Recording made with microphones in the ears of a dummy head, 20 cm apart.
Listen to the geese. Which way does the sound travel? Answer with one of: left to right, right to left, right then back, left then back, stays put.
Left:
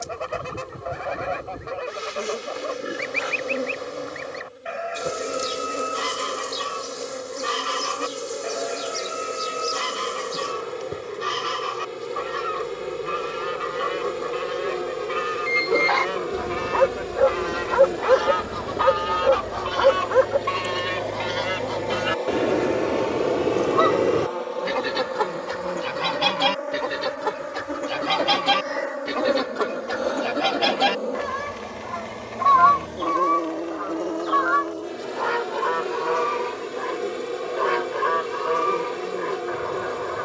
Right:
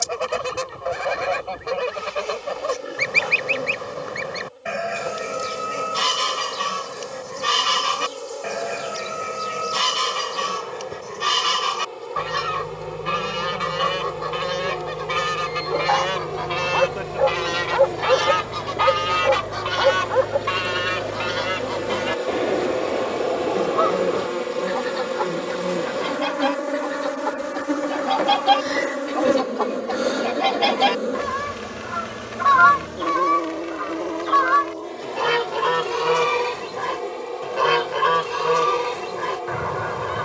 left then back.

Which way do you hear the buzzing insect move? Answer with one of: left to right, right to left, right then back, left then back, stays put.
right then back.